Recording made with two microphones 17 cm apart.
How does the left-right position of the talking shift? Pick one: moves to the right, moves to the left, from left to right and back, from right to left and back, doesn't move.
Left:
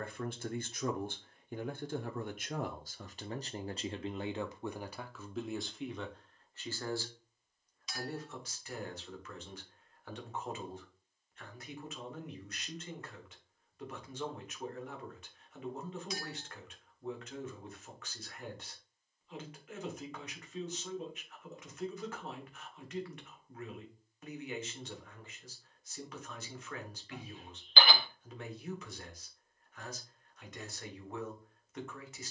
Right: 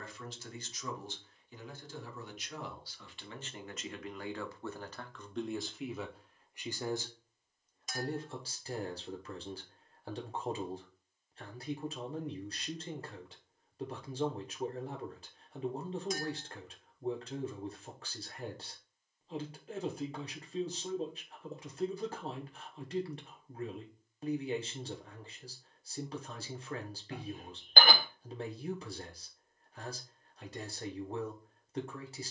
moves to the right.